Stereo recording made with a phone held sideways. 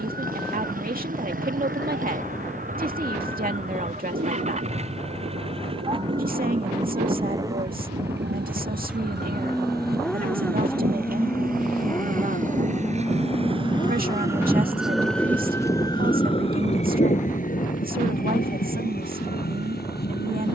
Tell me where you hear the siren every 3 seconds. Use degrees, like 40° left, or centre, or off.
80° right, 80° right, 70° right, 60° right, 30° right, 30° left, 60° left.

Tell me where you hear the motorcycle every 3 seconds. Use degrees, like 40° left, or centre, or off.
50° right, 40° right, 20° right, 10° left, 30° left, 50° left, 60° left.